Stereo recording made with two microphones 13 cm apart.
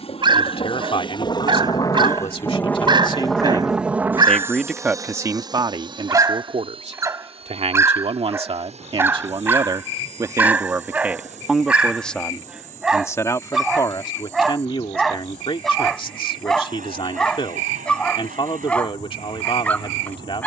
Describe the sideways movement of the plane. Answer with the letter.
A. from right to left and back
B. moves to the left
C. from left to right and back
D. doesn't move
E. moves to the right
E.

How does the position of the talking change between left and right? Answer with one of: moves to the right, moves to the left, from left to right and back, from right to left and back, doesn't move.
from left to right and back.